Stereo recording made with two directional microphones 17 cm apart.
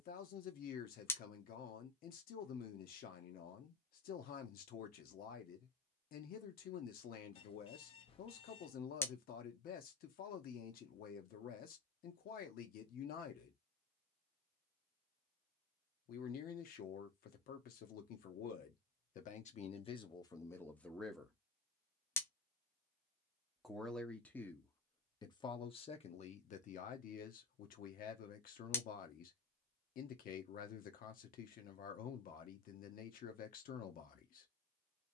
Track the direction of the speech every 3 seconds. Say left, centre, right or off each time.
left, left, left, left, left, left, left, centre, left, left, left, left.